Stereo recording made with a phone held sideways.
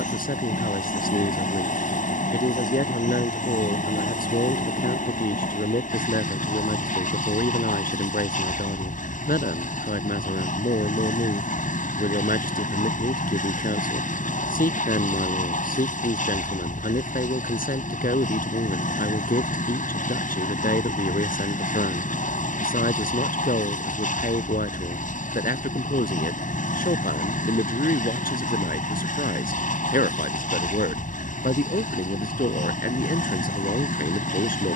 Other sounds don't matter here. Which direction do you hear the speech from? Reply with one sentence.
You can hear the speech on the left.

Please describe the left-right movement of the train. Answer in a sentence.
In this clip you hear the train stay put.